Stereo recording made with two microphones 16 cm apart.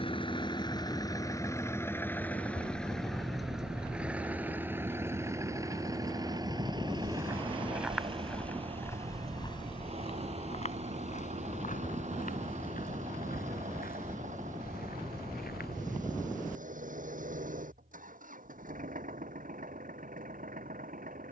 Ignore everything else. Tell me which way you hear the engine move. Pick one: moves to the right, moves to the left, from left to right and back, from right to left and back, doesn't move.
moves to the right.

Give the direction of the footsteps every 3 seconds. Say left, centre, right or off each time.
off, off, centre, left, left, left, off.